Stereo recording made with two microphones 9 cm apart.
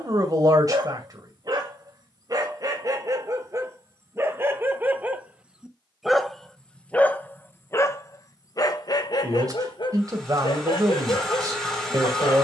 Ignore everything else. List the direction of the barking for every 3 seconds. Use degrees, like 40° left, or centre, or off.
50° right, 30° right, 30° left, 60° left.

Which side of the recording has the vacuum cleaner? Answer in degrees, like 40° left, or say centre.
centre.